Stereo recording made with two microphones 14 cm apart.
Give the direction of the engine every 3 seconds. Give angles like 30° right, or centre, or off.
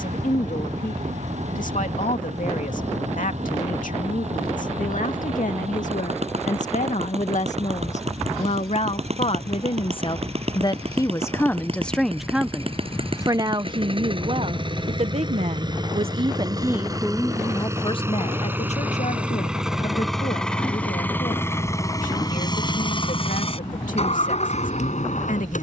60° right, 50° right, 50° right, 50° right, 40° right, 30° right, centre, 30° left, 50° left.